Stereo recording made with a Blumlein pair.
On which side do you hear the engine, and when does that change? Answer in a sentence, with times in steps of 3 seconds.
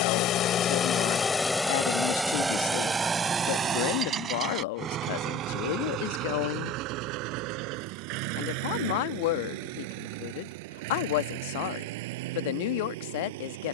You can hear the engine in the centre from 0 s and on the right from 3 s.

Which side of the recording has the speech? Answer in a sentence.
In this clip you hear the speech on the left.